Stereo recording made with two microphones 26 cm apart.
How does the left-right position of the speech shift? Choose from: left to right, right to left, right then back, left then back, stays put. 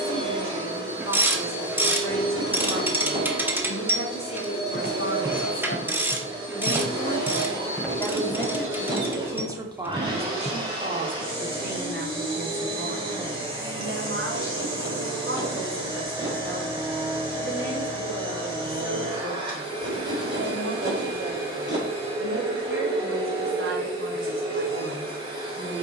left to right.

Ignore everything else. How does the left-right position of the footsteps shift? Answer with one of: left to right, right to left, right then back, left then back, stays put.
left then back.